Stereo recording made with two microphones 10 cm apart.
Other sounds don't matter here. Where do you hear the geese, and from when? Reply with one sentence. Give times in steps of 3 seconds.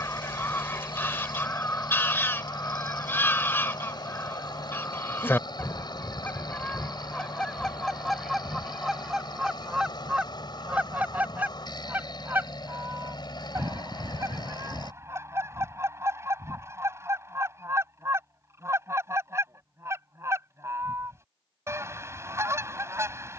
In this clip you hear the geese on the left from 0 s, in the centre from 6 s and on the right from 12 s.